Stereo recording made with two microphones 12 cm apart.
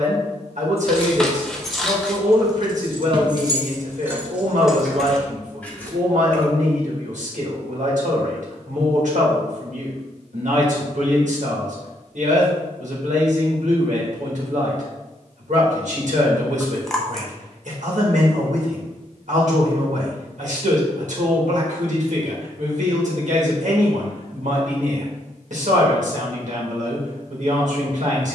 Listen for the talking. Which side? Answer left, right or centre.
right.